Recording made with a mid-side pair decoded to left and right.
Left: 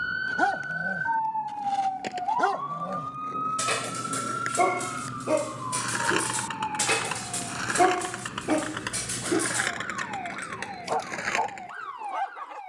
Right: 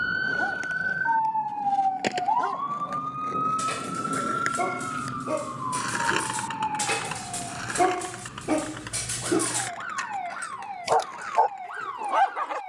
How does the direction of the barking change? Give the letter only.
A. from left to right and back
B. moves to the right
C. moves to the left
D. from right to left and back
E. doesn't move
B.